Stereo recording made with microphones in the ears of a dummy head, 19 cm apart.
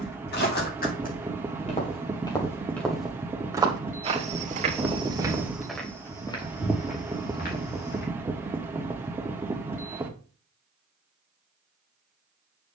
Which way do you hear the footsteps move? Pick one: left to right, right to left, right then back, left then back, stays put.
right then back.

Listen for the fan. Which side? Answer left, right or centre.
centre.